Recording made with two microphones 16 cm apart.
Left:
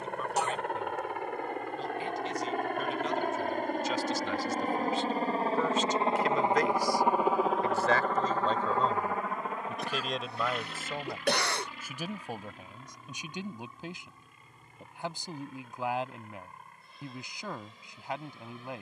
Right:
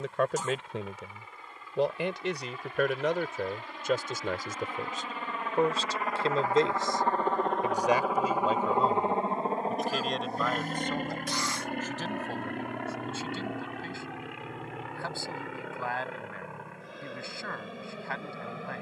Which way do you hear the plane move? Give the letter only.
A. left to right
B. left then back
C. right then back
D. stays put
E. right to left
A.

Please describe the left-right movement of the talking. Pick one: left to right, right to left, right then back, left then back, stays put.
right to left.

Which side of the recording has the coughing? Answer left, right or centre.
left.